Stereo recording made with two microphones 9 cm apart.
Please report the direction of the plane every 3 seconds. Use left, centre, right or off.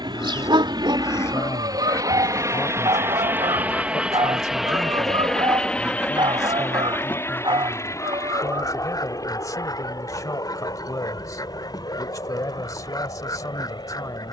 right, centre, left, left, left.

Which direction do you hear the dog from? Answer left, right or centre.
right.